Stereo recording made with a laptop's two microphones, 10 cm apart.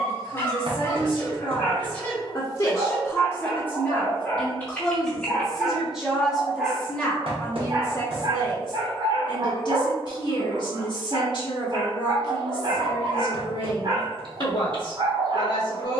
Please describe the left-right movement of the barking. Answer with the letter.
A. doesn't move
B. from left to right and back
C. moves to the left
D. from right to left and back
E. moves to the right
E.